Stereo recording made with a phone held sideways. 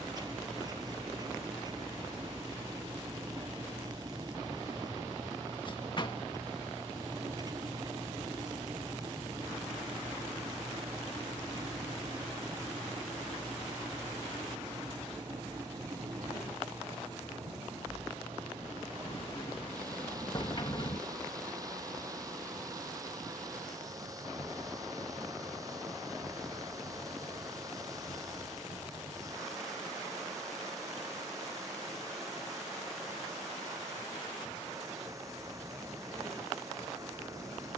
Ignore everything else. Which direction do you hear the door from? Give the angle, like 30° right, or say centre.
40° left.